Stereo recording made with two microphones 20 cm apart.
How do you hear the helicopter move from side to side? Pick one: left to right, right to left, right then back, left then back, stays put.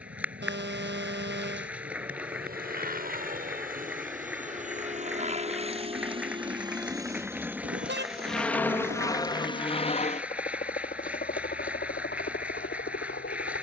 right to left.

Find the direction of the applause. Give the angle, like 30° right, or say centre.
10° right.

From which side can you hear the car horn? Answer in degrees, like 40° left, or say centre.
60° right.